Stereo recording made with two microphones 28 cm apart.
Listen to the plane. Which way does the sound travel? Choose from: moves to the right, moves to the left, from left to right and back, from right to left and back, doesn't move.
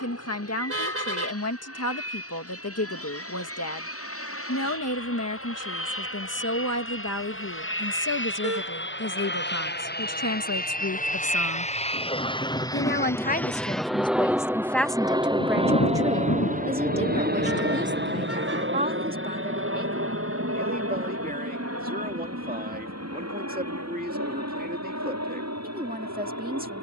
moves to the right.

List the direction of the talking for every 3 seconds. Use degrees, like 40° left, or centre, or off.
70° left, 70° left, 70° left, 70° left, 20° left, 20° right, 30° right, 30° right, 30° right.